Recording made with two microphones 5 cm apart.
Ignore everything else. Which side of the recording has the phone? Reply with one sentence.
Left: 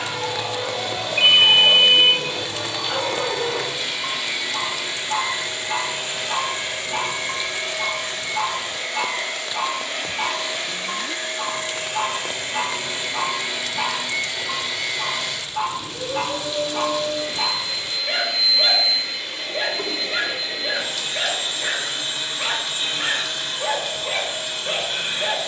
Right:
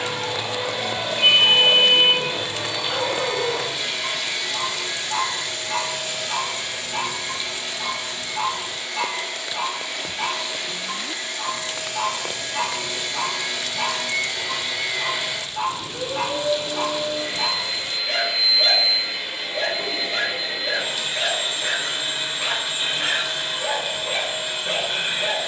In this clip you hear the phone on the left.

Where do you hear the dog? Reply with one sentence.
In this clip you hear the dog on the left.